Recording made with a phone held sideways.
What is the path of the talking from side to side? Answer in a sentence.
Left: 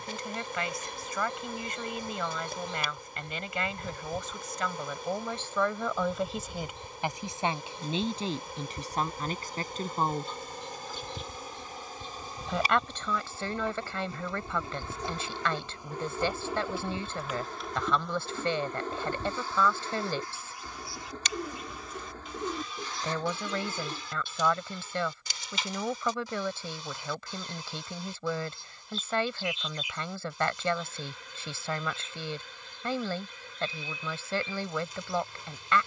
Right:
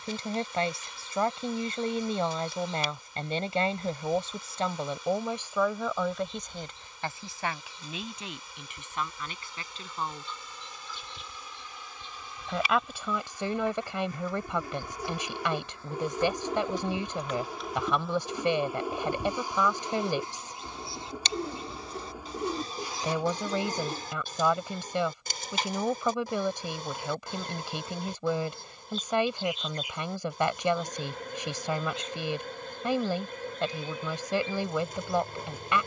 In this clip you hear the talking move from right to left and back again.